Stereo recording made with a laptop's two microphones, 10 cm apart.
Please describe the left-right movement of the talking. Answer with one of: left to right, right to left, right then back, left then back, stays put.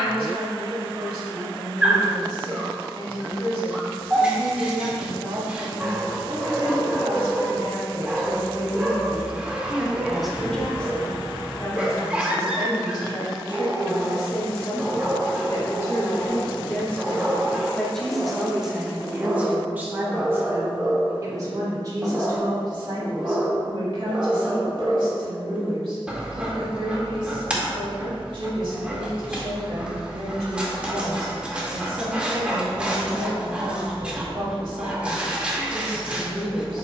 left then back.